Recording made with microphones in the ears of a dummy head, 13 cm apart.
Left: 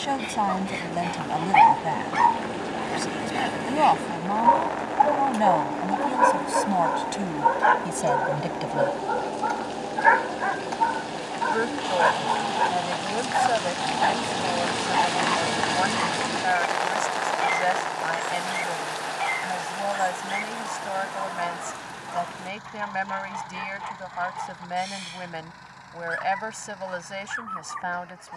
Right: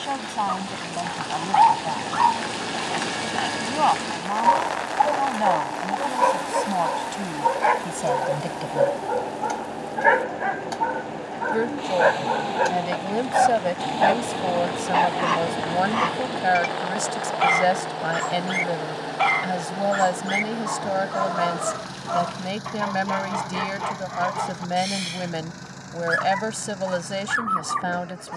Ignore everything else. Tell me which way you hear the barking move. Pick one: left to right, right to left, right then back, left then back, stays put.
left to right.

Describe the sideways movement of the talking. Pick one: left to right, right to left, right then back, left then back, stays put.
left to right.